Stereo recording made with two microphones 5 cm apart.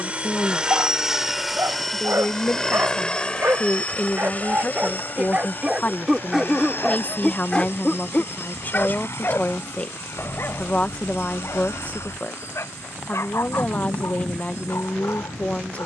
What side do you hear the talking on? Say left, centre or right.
left.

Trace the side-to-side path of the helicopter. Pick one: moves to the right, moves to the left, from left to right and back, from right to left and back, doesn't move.
moves to the left.